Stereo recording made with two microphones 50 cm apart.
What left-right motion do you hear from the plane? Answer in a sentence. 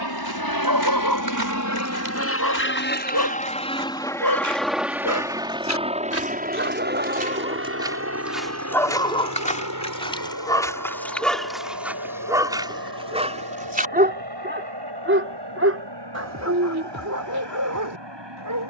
You can hear the plane travel towards the right.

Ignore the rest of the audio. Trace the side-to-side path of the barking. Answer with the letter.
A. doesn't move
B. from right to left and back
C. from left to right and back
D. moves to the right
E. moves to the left
B.